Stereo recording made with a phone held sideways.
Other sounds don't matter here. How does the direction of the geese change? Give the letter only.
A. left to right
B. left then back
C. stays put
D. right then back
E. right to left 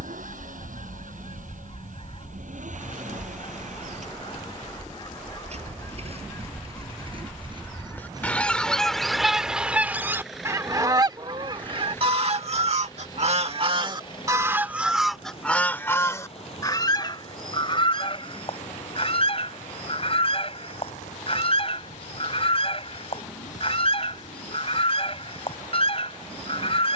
D.